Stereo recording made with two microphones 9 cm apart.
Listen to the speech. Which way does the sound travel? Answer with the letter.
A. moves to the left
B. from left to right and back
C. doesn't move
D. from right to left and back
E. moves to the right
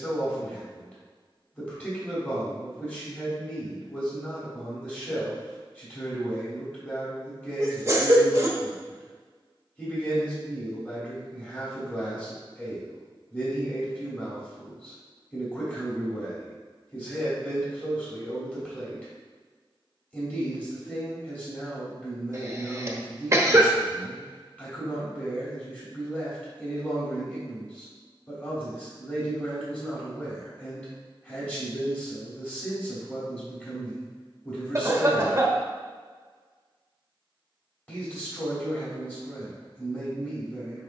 C.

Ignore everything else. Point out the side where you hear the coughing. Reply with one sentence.
In this clip you hear the coughing on the right.